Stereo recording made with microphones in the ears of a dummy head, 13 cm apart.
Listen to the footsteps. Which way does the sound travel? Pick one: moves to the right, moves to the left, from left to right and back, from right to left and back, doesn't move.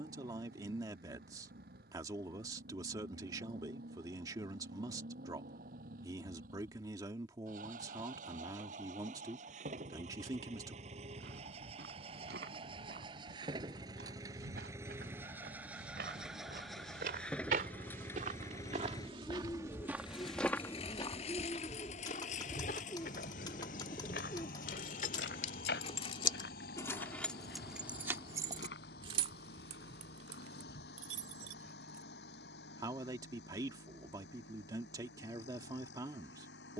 moves to the left.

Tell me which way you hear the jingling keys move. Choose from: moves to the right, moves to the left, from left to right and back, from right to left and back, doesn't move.
moves to the right.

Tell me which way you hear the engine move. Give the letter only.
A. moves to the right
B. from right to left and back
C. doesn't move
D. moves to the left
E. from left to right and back
D.